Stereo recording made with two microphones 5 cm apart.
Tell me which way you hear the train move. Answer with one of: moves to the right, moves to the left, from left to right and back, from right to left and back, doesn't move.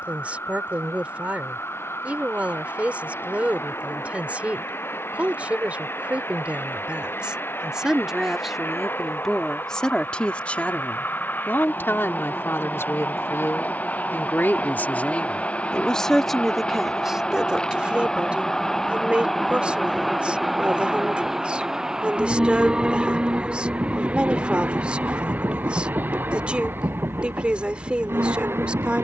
moves to the right.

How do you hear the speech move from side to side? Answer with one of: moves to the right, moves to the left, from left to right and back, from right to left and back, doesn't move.
from right to left and back.